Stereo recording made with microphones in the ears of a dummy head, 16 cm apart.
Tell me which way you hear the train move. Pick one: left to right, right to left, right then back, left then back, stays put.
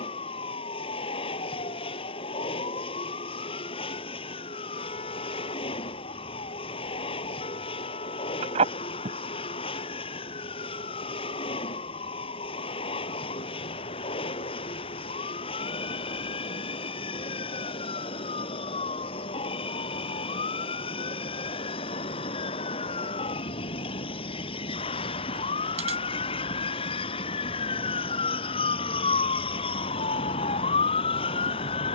stays put.